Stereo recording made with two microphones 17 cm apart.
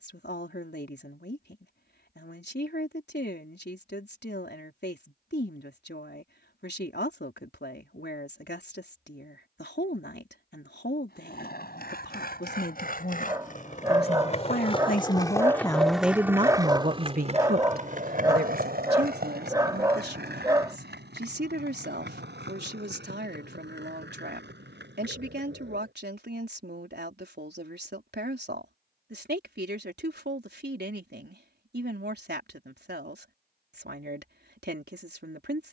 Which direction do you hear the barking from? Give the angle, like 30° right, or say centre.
20° right.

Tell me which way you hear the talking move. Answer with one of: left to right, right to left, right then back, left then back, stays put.
left to right.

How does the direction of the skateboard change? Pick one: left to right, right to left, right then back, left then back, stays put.
left to right.